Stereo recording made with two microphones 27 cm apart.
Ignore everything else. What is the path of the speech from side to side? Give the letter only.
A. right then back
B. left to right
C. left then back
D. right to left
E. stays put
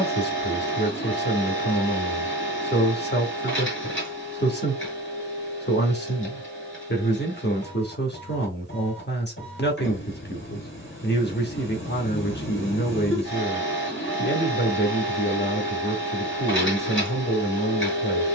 E.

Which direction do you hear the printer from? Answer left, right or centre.
left.